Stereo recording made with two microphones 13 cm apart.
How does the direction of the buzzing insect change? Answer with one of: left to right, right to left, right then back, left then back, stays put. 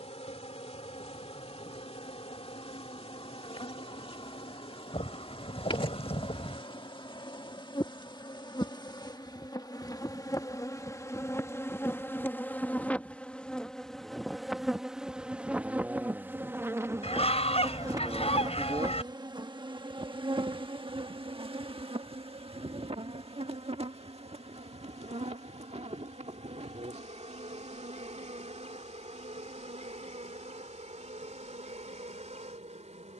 left to right.